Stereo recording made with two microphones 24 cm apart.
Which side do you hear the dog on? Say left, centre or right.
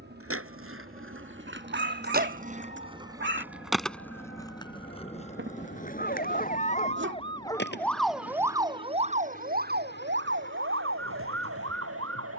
right.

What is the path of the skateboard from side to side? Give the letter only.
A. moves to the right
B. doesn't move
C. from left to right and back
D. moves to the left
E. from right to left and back
D.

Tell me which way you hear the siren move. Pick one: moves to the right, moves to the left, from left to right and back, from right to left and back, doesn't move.
moves to the right.